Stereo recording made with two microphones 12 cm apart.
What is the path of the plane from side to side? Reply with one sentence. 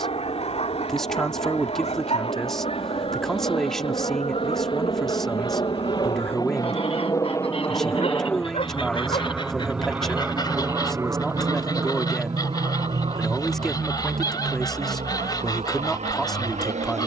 You can hear the plane travel towards the right.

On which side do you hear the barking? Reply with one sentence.
In this clip you hear the barking on the left.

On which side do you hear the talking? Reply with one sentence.
You can hear the talking in the centre.